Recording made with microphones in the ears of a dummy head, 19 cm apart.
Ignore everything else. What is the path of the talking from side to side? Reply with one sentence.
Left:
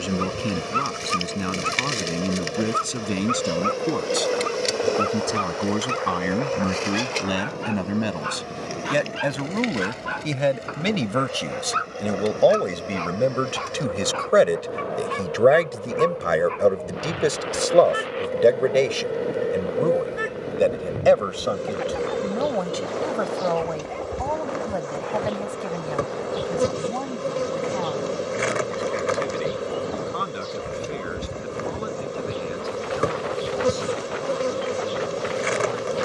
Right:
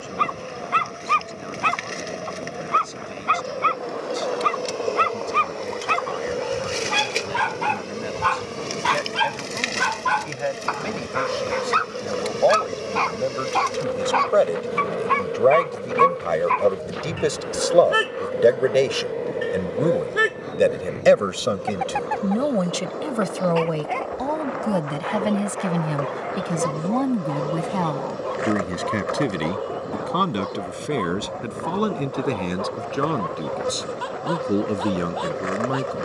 In this clip you hear the talking go from the left side to the right.